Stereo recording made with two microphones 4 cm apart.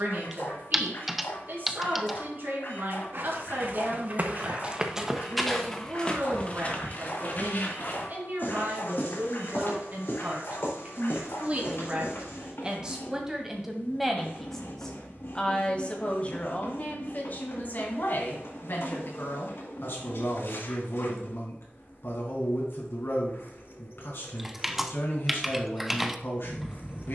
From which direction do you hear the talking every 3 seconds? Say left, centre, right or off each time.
right, right, right, right, centre, left, left, left, left.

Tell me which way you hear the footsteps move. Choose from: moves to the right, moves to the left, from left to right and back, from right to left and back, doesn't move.
moves to the left.